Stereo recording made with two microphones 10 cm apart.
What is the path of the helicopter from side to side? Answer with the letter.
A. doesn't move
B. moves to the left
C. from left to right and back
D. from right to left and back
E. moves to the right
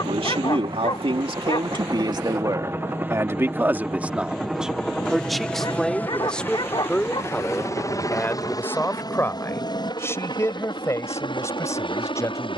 B.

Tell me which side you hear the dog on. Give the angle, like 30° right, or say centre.
50° left.